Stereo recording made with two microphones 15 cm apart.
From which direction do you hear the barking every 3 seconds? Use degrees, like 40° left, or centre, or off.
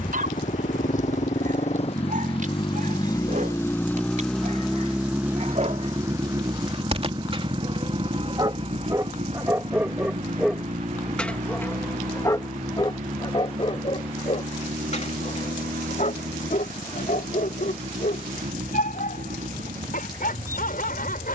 60° right, 50° right, 40° right, centre, 40° left, 60° left, 70° left.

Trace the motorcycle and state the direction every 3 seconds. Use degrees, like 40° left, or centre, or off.
50° left, centre, 30° right, 50° right, 60° right, 60° right, 60° right.